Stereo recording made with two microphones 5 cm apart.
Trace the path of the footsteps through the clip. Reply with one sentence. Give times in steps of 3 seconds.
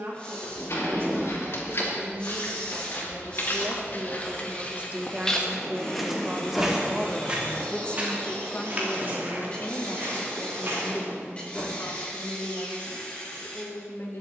In this clip you hear the footsteps on the left from 0 s, on the right from 6 s and not at all from 12 s.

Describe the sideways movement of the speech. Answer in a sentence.
You can hear the speech move from right to left.